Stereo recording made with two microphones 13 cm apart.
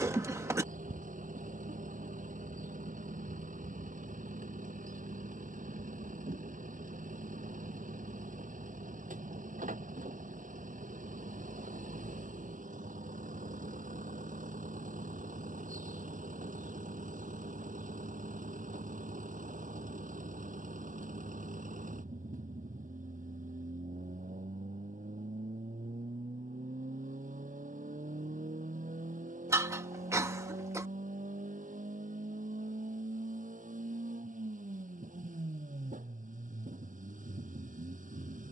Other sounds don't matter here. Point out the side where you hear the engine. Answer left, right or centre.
right.